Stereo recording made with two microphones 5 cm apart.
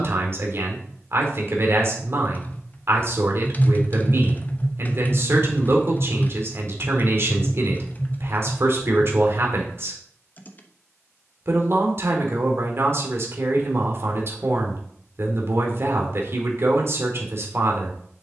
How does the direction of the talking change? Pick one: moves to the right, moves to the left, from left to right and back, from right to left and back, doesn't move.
doesn't move.